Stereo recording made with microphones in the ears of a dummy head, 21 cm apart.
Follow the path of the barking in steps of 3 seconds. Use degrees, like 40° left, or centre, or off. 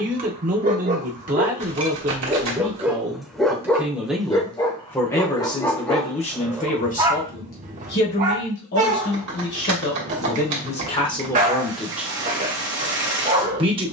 30° right, 10° left, 20° right, 30° right, 30° right.